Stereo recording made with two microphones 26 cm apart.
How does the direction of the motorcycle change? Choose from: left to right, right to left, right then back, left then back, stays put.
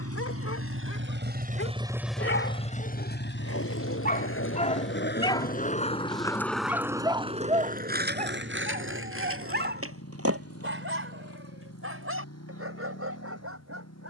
right to left.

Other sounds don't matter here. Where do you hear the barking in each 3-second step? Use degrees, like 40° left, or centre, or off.
60° left, 30° left, 20° right, 50° right, 60° right.